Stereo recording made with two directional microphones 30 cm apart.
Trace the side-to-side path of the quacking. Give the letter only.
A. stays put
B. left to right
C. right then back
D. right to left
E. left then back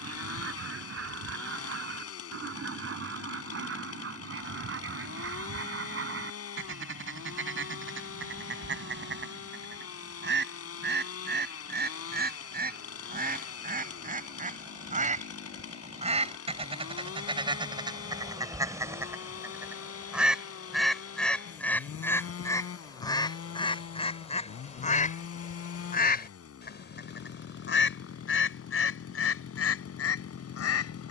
D.